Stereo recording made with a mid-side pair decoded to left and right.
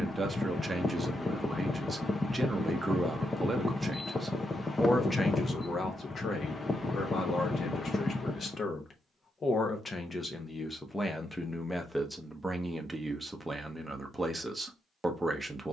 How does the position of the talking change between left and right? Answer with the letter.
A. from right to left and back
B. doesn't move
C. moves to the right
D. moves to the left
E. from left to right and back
A.